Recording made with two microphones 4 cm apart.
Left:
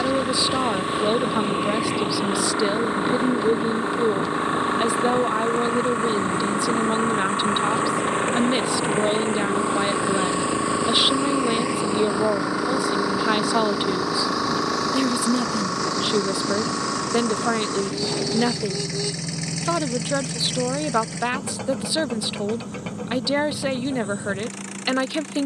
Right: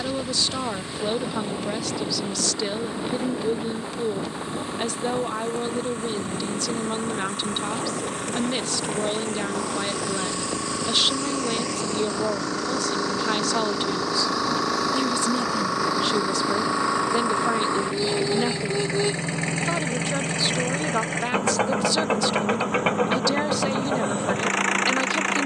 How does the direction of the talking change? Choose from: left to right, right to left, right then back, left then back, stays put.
stays put.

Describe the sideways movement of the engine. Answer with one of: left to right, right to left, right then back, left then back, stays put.
left to right.